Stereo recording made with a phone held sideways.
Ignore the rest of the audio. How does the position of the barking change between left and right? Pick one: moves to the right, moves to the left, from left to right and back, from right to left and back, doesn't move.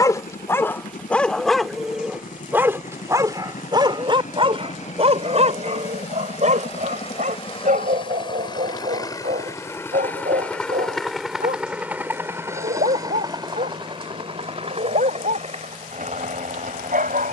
moves to the right.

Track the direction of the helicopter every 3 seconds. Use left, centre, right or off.
left, left, left, centre, right, right.